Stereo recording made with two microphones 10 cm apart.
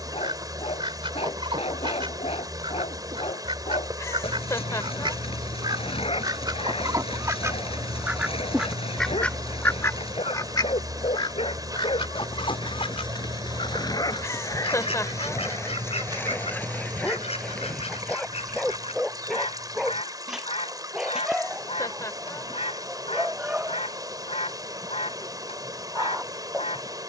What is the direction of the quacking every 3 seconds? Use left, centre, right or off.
right, right, right, left, left, left, left, left, left.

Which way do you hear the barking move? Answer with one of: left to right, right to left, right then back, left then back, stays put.
left to right.